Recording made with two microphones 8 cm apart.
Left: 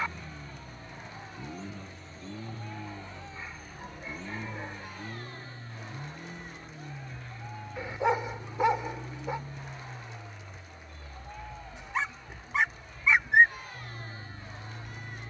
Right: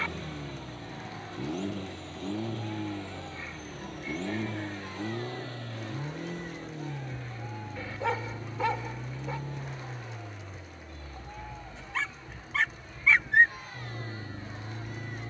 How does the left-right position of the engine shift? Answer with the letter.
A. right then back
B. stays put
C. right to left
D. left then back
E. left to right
B.